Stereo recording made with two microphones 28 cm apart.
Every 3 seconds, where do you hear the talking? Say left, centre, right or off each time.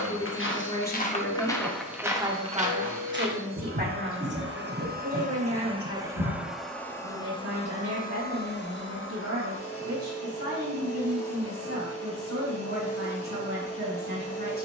centre, right, right, right, right.